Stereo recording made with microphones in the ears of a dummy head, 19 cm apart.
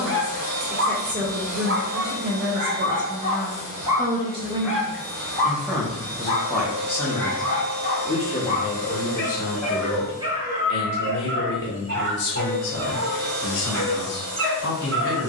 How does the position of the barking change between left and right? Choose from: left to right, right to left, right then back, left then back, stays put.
left then back.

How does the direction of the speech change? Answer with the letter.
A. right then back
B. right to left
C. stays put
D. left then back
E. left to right
B.